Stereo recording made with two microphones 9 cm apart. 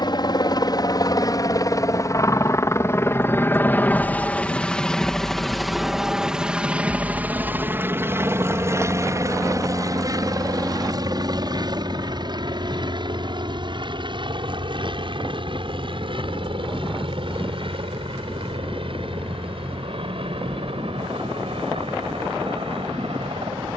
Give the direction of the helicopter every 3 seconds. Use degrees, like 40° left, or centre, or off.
40° left, 10° left, 20° right, 40° right, 50° right, 60° right, 60° right, 70° right.